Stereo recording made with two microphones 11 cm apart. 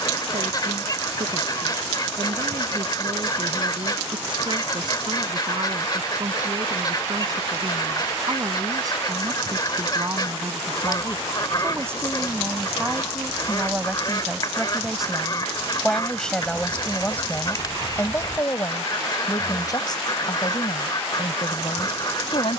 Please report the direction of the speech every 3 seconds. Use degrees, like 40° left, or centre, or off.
50° right, 40° right, 40° right, 30° right, 10° right, 10° left, 30° left, 50° left.